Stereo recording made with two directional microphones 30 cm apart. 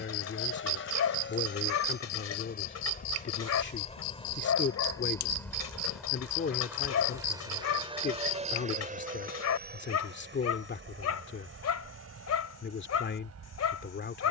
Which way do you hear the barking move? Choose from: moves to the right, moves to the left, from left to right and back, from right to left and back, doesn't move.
doesn't move.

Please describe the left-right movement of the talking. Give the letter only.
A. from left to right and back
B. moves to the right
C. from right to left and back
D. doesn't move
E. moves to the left
D.